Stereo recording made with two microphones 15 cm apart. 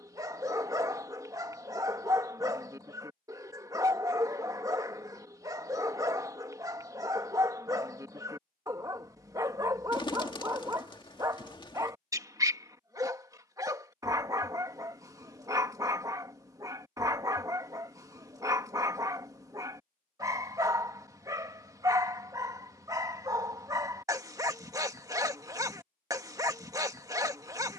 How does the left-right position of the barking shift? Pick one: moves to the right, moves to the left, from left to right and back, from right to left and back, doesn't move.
doesn't move.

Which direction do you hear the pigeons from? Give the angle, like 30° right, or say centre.
30° left.